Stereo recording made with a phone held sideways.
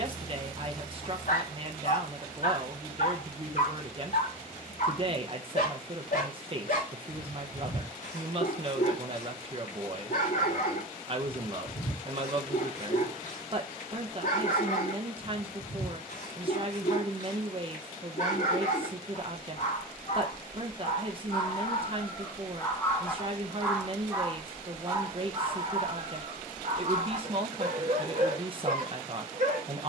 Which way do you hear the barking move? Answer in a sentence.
You can hear the barking move from left to right.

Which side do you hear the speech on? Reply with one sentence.
In this clip you hear the speech on the right.